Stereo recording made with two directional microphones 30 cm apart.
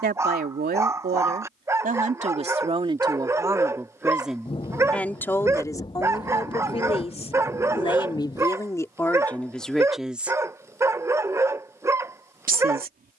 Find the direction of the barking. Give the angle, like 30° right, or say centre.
10° right.